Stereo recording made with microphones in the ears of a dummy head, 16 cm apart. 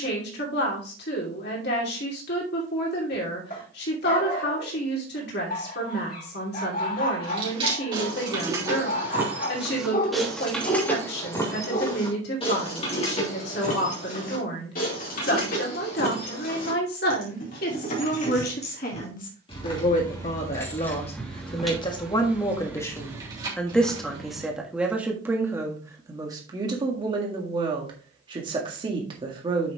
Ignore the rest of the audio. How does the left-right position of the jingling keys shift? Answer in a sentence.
In this clip you hear the jingling keys go left and come back.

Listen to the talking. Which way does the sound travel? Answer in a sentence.
You can hear the talking go from the left side to the right.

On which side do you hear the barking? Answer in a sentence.
In this clip you hear the barking on the left.